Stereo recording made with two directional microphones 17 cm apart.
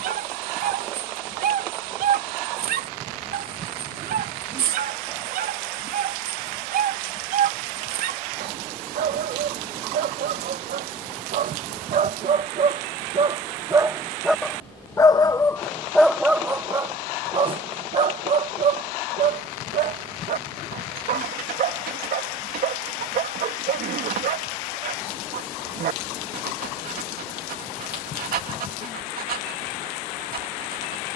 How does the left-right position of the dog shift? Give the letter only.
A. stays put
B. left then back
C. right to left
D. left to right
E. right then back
B.